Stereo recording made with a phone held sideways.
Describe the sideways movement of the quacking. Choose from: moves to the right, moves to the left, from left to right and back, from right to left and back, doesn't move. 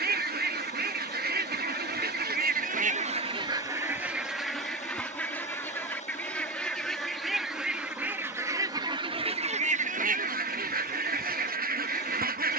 from right to left and back.